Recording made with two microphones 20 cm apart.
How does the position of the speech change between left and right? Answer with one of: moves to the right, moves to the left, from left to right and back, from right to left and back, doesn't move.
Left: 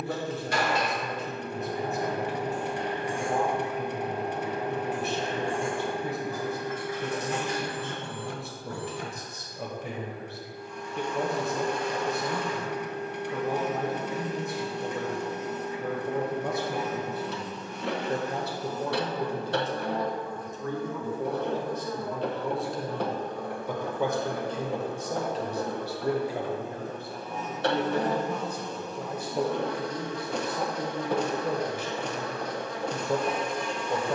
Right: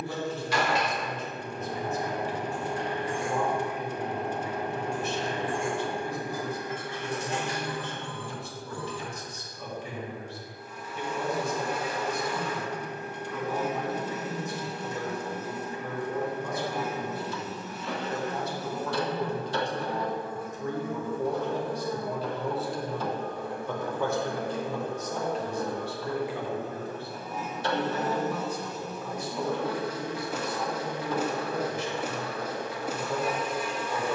from left to right and back.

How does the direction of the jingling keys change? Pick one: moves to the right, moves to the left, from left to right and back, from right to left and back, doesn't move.
moves to the right.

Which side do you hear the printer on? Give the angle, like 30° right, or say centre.
60° left.